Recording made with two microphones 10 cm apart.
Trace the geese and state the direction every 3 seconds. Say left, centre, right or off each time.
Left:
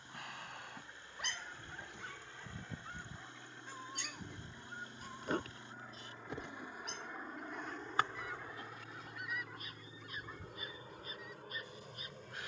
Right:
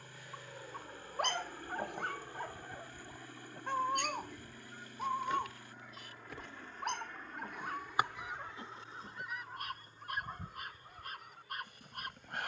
left, left, centre, right.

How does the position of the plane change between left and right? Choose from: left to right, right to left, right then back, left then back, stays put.
right to left.